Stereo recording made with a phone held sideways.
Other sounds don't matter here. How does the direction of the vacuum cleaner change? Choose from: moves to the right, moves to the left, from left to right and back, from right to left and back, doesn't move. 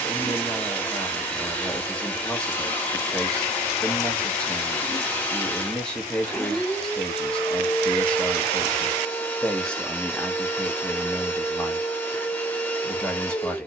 doesn't move.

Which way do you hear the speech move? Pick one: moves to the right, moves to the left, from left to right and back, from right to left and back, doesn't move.
doesn't move.